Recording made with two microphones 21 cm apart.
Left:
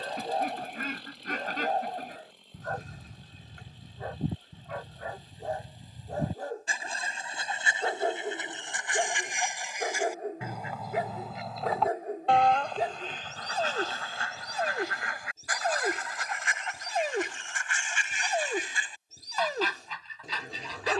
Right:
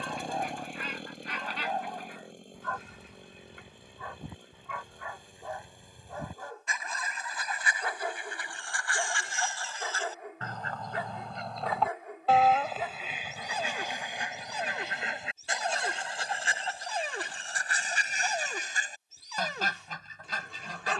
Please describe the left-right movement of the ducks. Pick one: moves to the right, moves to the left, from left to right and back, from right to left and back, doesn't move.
moves to the right.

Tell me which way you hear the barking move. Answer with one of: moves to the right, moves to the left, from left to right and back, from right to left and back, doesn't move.
doesn't move.